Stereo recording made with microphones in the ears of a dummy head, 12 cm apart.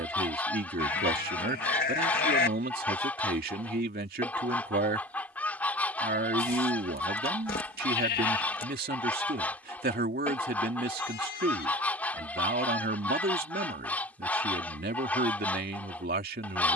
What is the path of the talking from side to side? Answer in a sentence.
In this clip you hear the talking stay in one place.